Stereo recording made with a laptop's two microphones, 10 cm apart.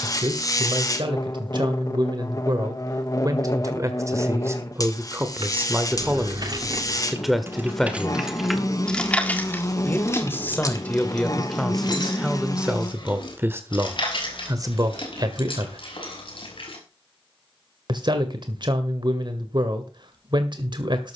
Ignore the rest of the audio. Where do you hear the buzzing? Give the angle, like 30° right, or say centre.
40° left.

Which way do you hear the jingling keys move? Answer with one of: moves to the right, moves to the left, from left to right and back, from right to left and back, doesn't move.
moves to the left.